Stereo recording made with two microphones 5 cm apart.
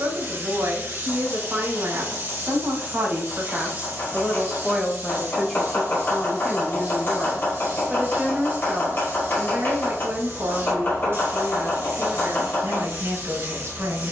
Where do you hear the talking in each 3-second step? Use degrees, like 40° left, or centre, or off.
50° right, 10° right, centre, 50° right, 60° right.